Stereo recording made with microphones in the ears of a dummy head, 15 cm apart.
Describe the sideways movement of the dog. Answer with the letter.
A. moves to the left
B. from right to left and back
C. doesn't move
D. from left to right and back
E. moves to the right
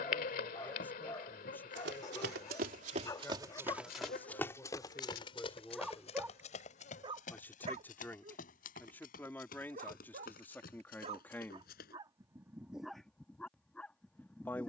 D.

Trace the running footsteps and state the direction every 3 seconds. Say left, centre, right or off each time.
right, centre, left, left, off.